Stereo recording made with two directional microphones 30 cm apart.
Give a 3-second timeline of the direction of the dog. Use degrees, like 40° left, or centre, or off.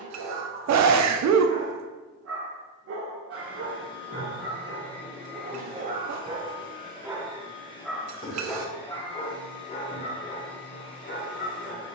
50° right, 40° right, 10° right, 30° left.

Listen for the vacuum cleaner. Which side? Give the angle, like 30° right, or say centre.
20° left.